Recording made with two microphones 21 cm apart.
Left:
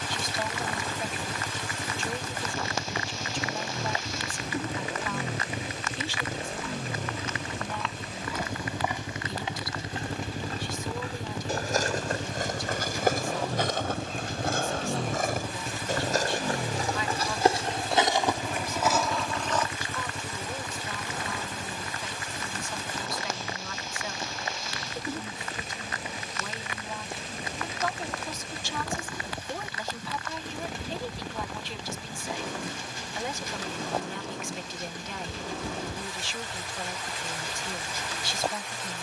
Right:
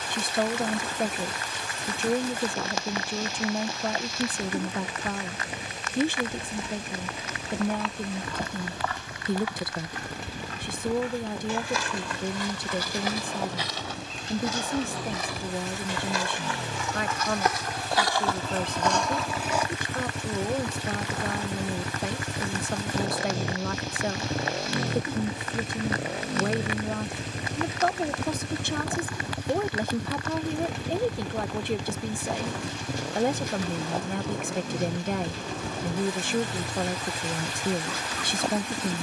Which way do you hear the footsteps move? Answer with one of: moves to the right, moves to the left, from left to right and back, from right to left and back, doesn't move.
from right to left and back.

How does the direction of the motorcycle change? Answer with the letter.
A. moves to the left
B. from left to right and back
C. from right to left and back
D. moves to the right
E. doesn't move
D.